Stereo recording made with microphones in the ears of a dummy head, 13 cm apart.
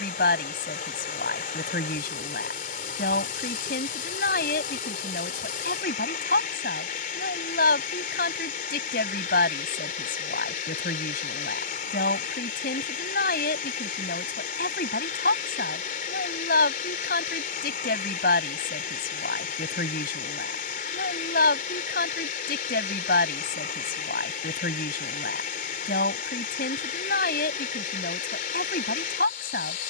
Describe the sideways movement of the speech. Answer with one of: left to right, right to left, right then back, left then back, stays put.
stays put.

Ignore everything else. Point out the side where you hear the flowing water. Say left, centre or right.
left.